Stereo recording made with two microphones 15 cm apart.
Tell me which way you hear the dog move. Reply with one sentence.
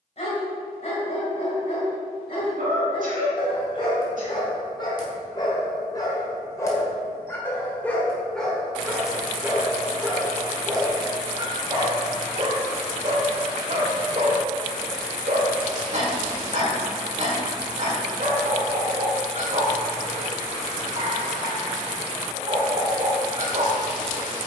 In this clip you hear the dog move from left to right.